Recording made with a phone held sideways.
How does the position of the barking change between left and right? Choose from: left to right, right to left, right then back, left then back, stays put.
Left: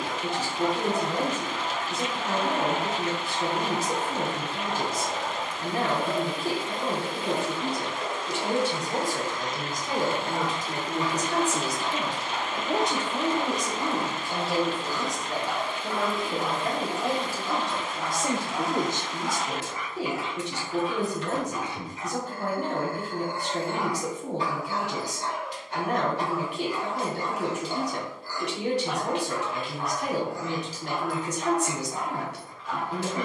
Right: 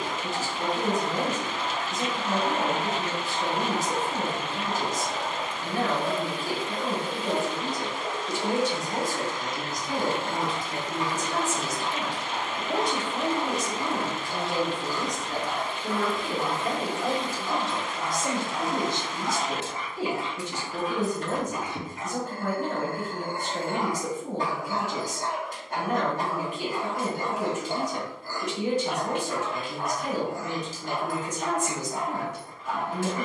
left to right.